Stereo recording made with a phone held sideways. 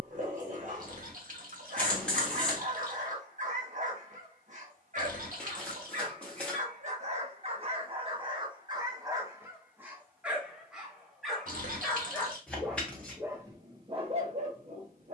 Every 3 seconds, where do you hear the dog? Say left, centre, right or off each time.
right, right, right, centre, right.